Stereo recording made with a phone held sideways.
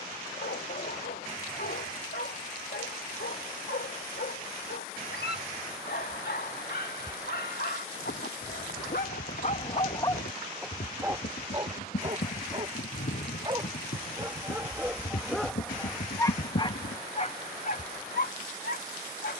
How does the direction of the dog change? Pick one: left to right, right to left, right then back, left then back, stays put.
right then back.